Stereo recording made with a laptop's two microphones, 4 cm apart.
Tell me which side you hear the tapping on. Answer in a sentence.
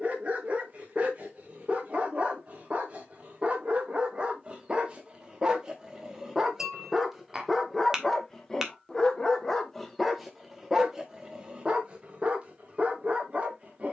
In this clip you hear the tapping in the centre.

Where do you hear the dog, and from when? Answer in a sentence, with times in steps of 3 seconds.
In this clip you hear the dog on the right from 0 s, in the centre from 6 s and on the right from 12 s.